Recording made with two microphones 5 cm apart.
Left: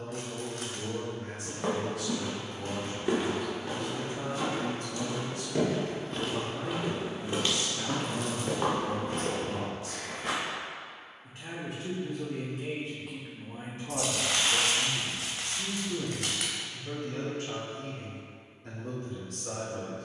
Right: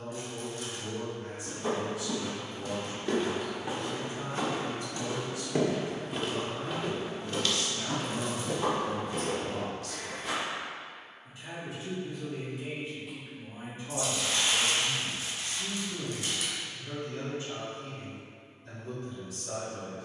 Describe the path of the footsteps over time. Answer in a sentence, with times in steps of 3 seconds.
You can hear the footsteps on the left from 0 s, on the right from 3 s, on the left from 6 s and not at all from 12 s.